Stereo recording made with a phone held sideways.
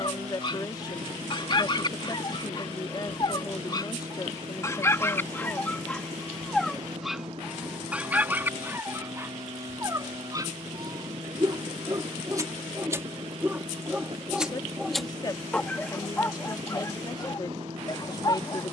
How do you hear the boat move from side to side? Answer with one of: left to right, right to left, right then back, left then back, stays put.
stays put.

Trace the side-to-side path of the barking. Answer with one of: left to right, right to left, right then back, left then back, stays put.
right then back.